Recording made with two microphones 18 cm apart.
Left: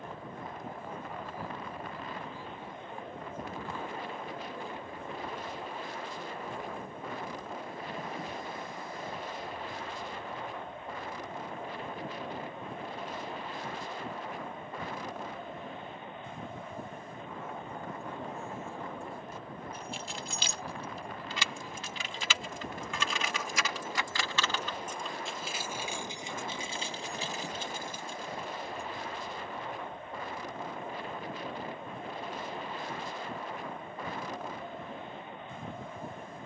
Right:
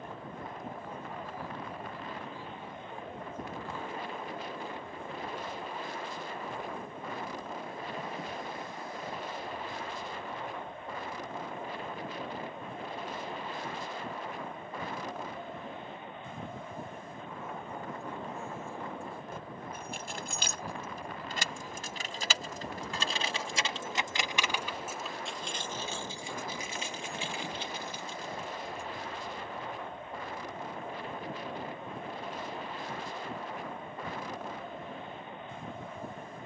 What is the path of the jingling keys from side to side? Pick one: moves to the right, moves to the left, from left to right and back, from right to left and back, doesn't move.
moves to the left.